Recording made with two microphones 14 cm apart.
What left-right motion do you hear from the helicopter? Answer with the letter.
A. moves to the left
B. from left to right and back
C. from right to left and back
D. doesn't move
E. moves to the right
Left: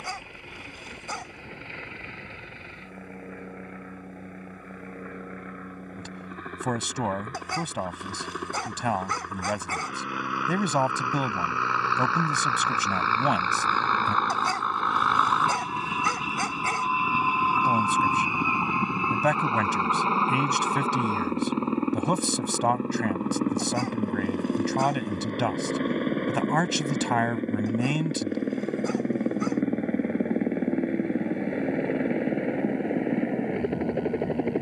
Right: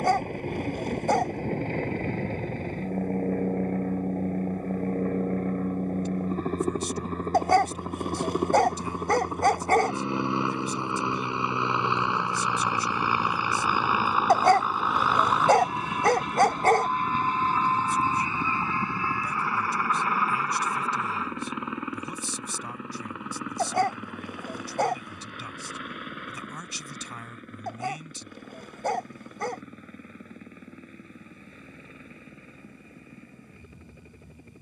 A.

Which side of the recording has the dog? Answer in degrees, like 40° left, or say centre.
60° right.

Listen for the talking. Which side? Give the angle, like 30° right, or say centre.
80° left.